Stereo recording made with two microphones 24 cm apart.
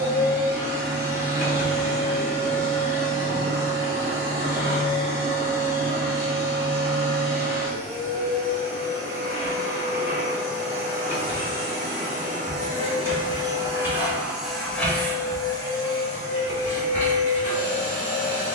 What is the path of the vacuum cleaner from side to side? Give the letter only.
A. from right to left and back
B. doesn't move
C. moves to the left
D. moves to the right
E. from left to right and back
C.